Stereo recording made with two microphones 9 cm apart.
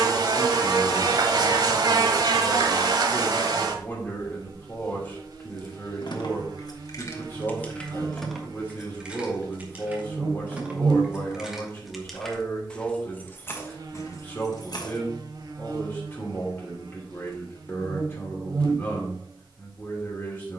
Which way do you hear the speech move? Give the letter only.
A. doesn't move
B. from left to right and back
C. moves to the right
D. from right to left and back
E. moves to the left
A.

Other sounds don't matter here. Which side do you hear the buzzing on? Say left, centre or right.
right.